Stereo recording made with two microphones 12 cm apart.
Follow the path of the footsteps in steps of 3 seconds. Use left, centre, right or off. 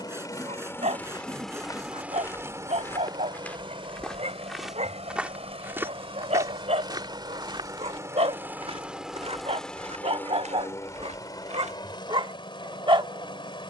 left, centre, right, right, off.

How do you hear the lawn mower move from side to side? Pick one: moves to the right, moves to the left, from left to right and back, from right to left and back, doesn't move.
from left to right and back.